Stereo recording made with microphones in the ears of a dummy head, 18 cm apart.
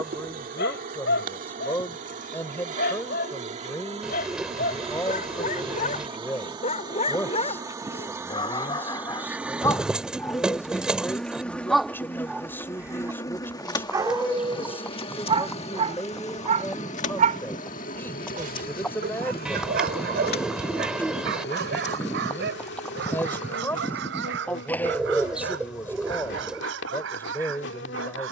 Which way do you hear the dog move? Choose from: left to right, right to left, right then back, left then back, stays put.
left to right.